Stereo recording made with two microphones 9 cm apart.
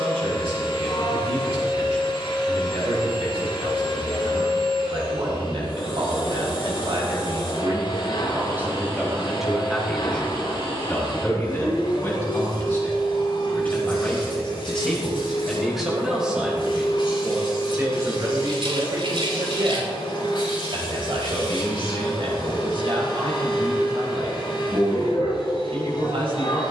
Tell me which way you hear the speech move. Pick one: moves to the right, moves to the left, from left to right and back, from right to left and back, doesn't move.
from right to left and back.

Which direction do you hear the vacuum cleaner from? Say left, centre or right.
left.